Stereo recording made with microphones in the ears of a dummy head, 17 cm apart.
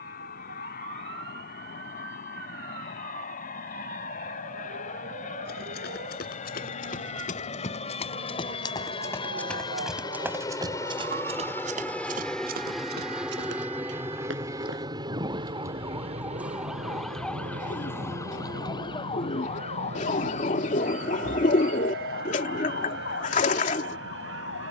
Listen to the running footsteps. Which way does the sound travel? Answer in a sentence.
In this clip you hear the running footsteps travel towards the right.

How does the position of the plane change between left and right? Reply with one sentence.
You can hear the plane go from the left side to the right.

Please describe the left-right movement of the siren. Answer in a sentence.
You can hear the siren go from the right side to the left.